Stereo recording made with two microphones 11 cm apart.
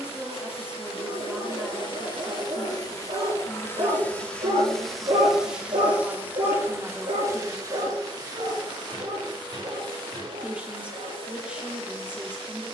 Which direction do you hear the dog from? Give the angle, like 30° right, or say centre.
70° right.